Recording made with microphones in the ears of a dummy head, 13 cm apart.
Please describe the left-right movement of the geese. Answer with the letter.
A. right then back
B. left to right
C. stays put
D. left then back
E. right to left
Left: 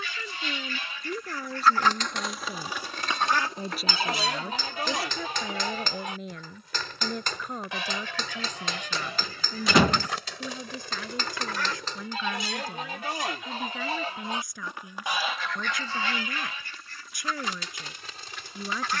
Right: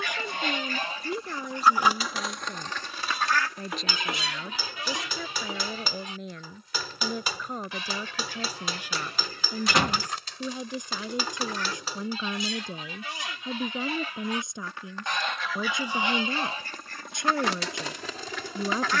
D.